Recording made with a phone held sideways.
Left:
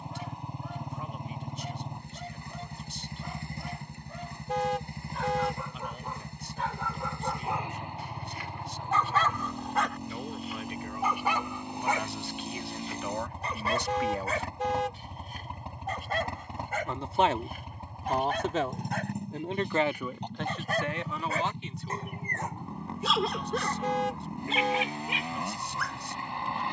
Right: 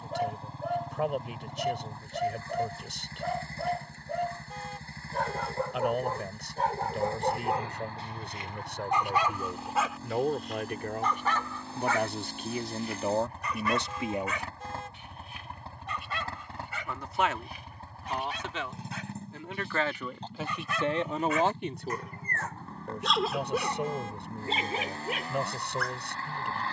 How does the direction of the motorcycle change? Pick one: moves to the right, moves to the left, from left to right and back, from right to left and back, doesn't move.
doesn't move.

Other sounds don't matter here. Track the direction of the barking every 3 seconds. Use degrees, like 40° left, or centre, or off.
60° right, 60° right, 40° right, centre, 30° left, 50° left, 50° left, 10° left, 50° right.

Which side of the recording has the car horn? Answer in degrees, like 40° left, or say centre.
70° left.